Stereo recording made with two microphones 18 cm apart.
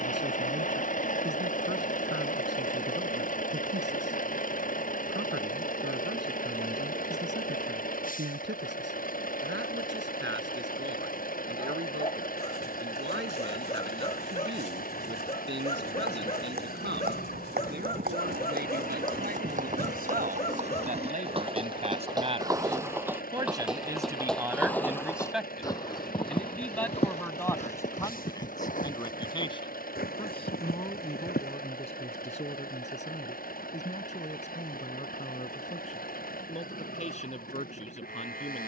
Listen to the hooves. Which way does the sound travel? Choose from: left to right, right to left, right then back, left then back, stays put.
right to left.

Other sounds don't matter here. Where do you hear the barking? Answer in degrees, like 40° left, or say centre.
30° left.